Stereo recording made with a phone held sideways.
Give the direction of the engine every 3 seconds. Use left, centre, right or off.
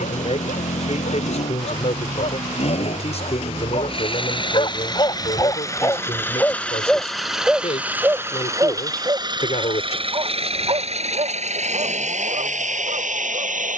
left, left, centre, right, right.